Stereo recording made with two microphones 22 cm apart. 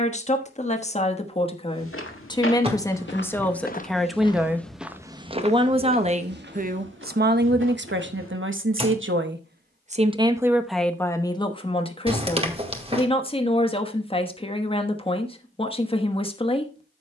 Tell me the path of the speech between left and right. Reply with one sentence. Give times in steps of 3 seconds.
In this clip you hear the speech on the left from 0 s, in the centre from 3 s, on the right from 6 s, in the centre from 9 s and on the left from 12 s.